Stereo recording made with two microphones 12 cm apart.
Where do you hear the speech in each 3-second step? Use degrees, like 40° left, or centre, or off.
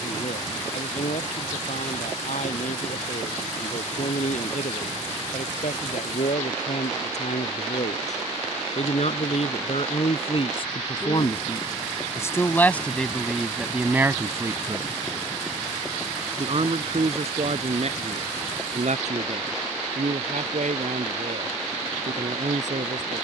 80° left, 70° left, 70° left, 50° left, centre, 50° right, 70° right, 70° right.